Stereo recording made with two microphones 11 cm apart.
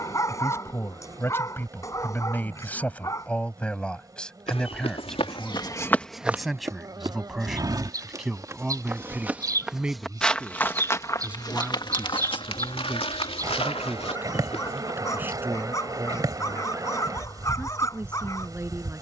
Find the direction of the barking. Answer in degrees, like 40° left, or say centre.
30° left.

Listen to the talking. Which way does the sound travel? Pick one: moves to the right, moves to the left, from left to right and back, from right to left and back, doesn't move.
moves to the right.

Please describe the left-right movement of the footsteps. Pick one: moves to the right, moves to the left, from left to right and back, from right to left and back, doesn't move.
from left to right and back.